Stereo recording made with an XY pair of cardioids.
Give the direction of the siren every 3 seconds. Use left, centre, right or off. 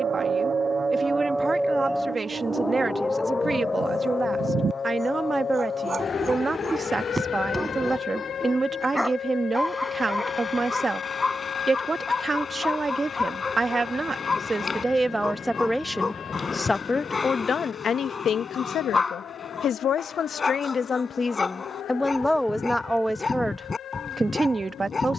centre, left, left, left, left, left, left, left, left.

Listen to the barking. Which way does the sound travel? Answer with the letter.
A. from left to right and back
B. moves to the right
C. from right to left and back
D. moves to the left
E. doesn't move
D.